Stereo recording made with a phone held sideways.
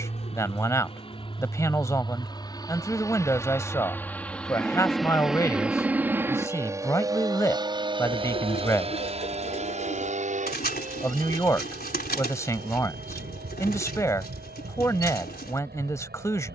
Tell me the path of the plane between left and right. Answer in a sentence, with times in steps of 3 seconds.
In this clip you hear the plane on the left from 0 s, in the centre from 3 s and on the right from 6 s.